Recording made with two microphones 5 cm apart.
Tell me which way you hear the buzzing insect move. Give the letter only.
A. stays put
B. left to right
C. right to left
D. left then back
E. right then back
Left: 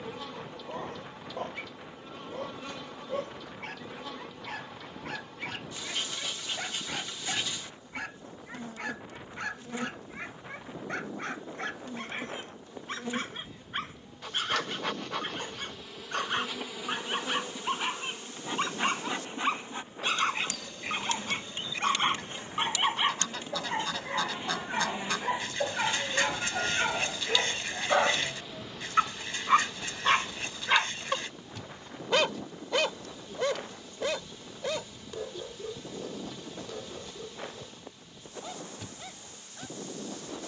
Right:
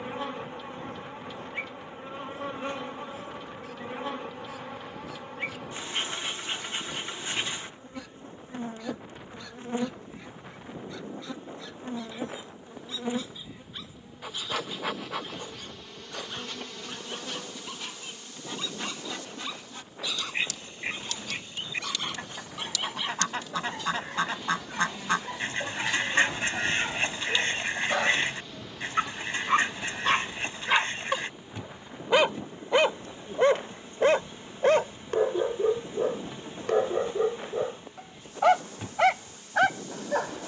D.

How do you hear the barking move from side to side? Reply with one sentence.
You can hear the barking go from the left side to the right.